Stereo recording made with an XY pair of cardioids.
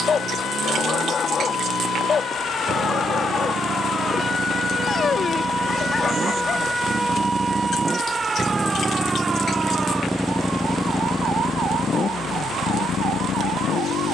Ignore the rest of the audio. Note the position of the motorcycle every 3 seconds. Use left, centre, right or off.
right, right, right, centre, left.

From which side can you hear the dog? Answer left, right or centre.
left.